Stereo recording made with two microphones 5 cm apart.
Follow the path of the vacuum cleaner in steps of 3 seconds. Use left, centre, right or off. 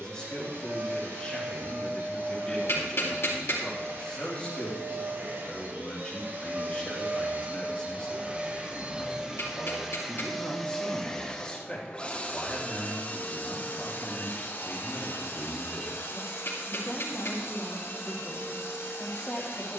right, right, right, centre, left, left, left.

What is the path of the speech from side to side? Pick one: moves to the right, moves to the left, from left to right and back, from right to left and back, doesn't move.
doesn't move.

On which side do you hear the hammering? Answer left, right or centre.
left.